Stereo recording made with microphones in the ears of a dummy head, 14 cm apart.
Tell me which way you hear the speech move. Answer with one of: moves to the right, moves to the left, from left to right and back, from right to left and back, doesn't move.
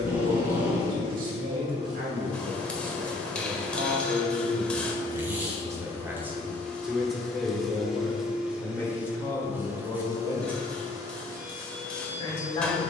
moves to the left.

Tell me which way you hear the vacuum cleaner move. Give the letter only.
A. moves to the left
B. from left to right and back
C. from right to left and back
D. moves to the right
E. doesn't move
C.